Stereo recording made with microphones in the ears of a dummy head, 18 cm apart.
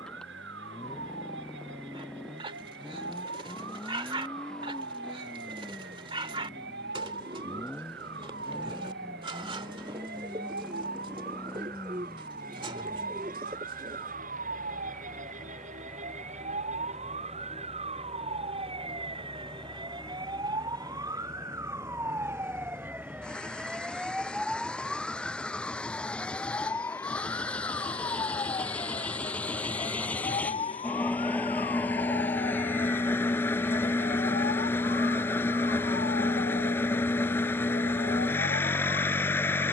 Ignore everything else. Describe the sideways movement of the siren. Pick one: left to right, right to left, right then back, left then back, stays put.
right to left.